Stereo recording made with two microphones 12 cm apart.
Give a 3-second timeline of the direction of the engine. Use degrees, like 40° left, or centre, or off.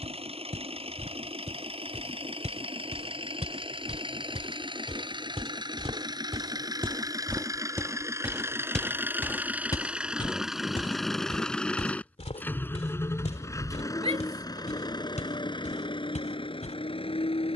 50° right, 40° right, 30° right, centre, 30° left, 50° left.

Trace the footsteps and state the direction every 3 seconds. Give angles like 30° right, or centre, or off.
80° right, 60° right, 30° right, 40° left, 70° left, 80° left.